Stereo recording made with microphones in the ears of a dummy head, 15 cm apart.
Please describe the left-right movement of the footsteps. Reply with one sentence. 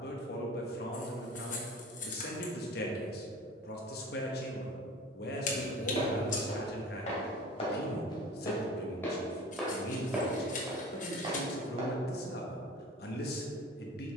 In this clip you hear the footsteps move from left to right.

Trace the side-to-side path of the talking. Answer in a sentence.
You can hear the talking stay in one place.